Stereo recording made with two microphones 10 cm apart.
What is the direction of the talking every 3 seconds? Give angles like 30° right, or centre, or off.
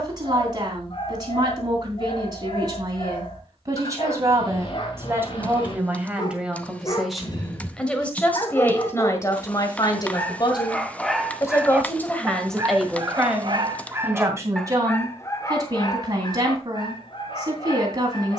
40° right, 30° right, centre, 30° left, 10° right, 40° right.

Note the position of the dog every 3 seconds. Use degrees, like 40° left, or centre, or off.
50° left, 50° left, 40° left, 10° left, 20° right, 40° left.